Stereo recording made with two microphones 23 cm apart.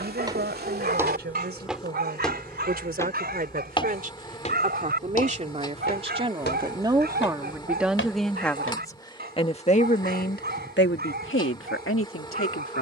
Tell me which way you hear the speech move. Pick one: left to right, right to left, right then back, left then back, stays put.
right to left.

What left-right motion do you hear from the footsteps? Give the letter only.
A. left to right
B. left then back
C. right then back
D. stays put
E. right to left
E.